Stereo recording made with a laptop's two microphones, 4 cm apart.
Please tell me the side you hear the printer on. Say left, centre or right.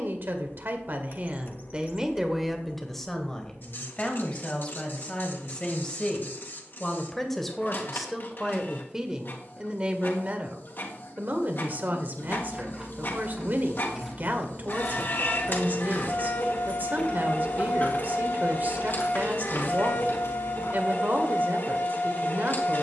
left.